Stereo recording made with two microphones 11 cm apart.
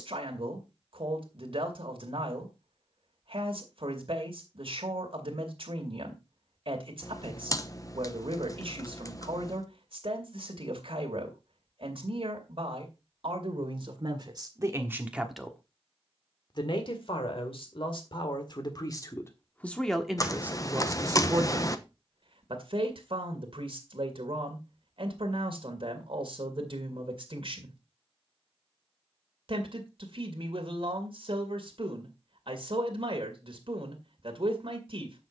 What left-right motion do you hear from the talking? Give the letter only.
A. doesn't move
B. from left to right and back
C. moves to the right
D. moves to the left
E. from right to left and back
E.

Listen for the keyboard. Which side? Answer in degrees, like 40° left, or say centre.
30° left.